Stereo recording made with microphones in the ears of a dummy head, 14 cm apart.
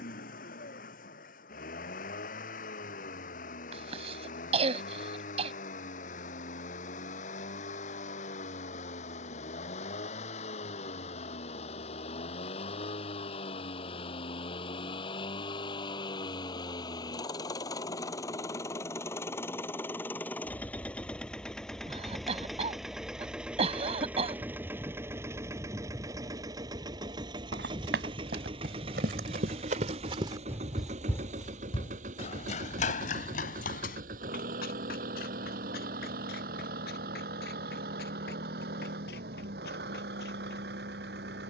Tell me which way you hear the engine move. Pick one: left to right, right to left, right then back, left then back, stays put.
left to right.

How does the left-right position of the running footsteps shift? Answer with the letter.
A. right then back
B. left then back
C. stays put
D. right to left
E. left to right
D.